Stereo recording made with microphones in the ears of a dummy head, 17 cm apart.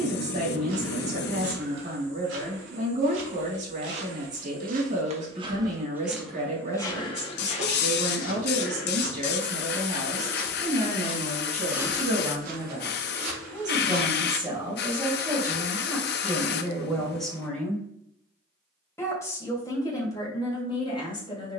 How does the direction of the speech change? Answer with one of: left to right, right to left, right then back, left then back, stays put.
right to left.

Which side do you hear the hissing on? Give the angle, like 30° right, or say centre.
60° left.